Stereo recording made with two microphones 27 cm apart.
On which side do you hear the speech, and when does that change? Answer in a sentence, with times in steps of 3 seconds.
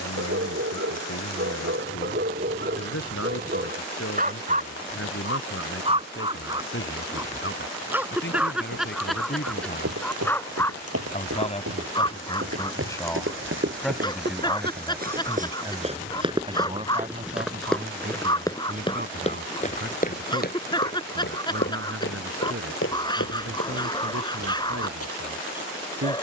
You can hear the speech on the left from 0 s, in the centre from 12 s and on the right from 15 s.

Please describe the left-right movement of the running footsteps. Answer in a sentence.
In this clip you hear the running footsteps move from right to left.